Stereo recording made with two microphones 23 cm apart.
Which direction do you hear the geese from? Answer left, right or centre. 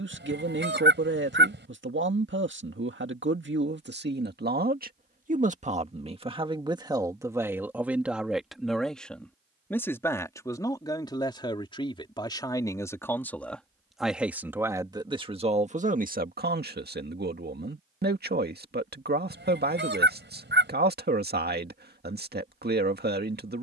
right.